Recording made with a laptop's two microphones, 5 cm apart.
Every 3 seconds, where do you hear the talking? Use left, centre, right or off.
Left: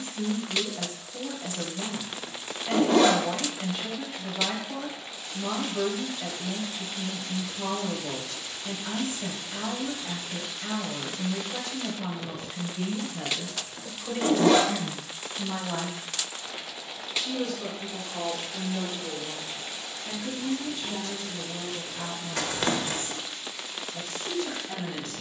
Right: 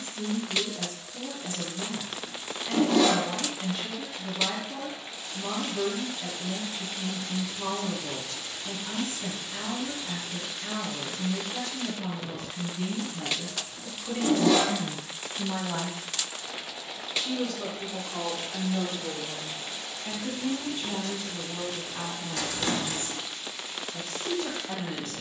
left, left, left, left, left, centre, right, right, right.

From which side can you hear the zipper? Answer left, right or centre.
left.